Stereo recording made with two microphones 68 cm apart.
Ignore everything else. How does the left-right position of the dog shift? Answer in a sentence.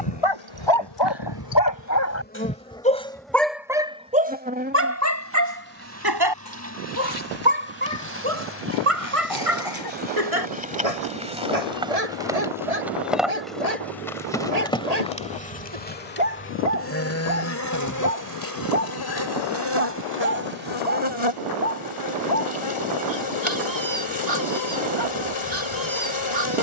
In this clip you hear the dog go from the left side to the right.